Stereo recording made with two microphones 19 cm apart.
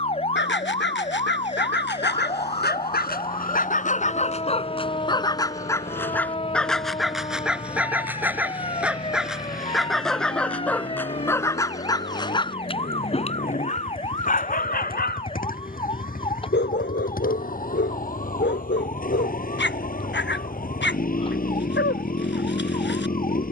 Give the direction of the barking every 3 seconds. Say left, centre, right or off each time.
left, left, centre, centre, left, left, left, left.